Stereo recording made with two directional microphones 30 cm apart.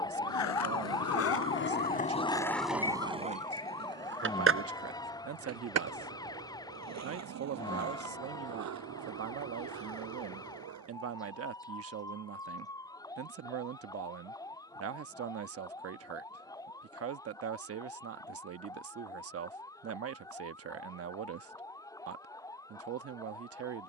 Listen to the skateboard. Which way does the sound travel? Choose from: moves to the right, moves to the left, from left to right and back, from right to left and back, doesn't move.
moves to the right.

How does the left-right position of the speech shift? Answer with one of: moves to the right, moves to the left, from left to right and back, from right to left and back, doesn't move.
doesn't move.